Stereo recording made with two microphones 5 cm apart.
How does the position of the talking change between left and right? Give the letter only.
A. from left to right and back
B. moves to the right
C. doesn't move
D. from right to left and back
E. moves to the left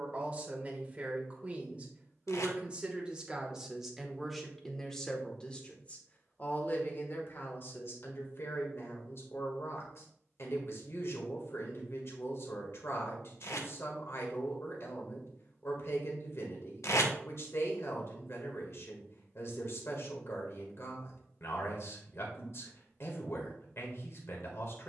E.